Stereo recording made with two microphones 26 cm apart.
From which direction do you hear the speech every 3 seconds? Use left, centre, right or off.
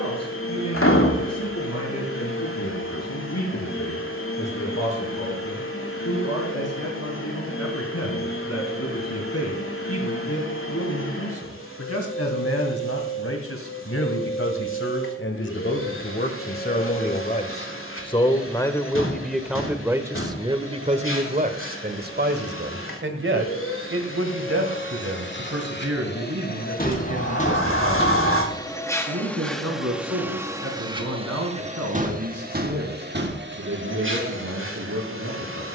left, left, left, left, left, left, centre, right, right, right, right, right.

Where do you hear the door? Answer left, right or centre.
left.